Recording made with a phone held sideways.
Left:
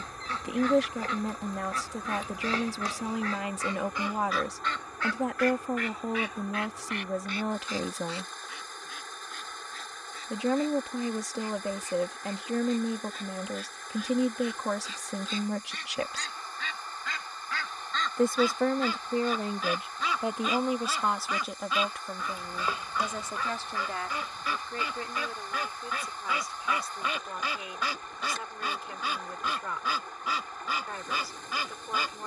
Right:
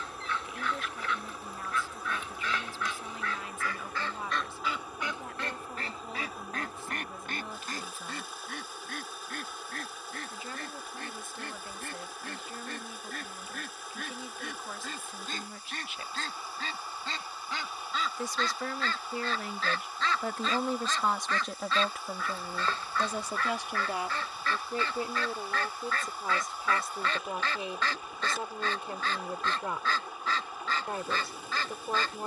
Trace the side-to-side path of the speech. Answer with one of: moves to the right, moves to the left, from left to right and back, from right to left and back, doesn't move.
moves to the right.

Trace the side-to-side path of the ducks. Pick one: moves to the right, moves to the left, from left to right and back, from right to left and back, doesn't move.
from left to right and back.